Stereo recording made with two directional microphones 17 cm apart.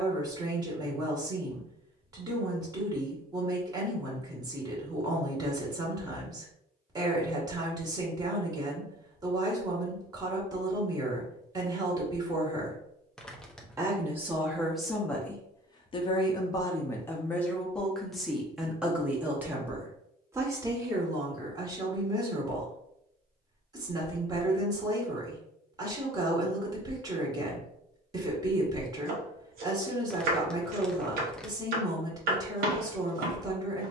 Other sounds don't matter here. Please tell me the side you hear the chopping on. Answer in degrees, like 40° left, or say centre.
60° right.